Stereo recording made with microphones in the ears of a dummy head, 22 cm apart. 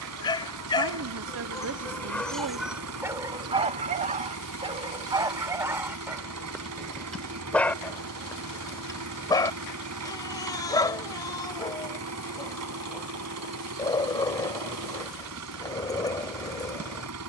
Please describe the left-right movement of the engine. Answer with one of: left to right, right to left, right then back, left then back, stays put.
stays put.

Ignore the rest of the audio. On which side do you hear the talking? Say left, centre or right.
right.